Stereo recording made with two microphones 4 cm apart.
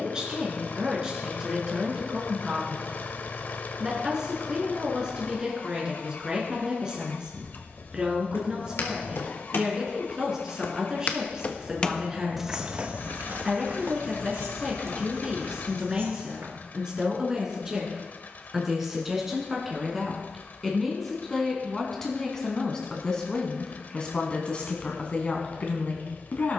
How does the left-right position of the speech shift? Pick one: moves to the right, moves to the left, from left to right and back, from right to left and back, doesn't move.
moves to the left.